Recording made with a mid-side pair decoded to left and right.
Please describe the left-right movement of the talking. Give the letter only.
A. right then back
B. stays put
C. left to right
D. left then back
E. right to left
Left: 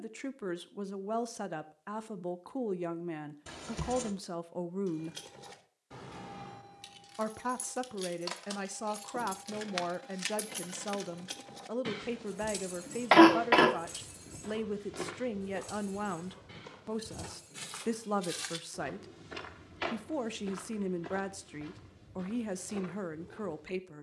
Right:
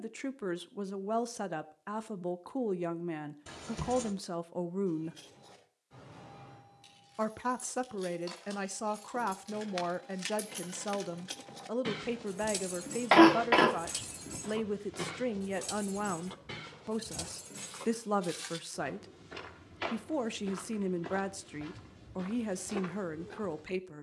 B.